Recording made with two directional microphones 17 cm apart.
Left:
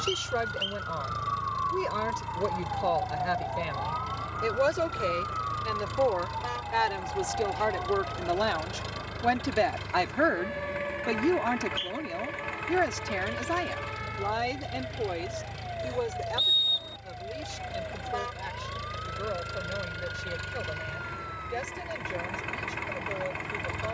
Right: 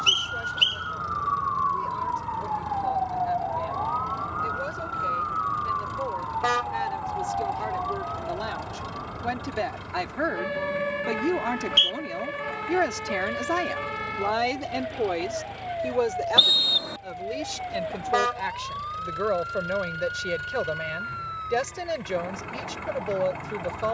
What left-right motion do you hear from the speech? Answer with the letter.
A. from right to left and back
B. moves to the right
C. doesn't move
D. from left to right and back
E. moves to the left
B.